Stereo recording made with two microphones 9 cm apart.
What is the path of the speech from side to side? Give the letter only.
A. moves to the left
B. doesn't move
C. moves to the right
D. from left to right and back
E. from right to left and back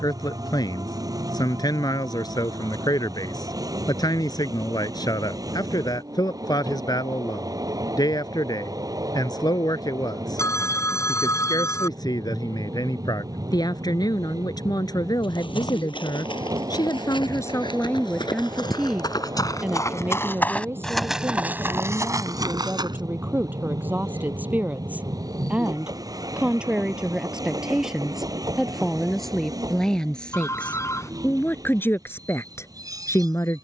D.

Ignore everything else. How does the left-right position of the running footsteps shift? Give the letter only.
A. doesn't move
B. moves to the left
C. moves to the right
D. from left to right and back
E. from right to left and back
C.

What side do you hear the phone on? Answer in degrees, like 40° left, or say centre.
30° left.